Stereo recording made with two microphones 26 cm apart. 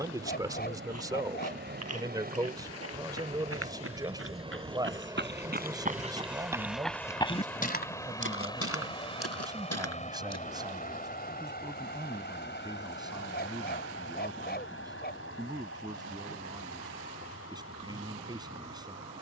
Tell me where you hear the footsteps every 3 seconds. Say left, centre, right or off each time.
right, right, left, left, off, off, off.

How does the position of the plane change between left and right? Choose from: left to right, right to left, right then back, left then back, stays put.
right to left.